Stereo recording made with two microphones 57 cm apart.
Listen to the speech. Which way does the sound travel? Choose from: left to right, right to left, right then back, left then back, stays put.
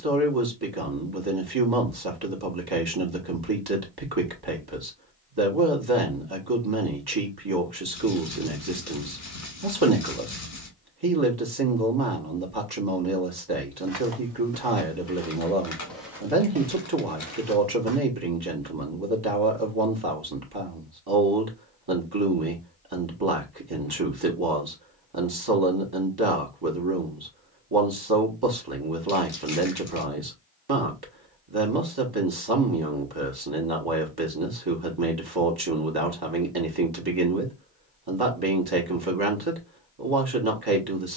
stays put.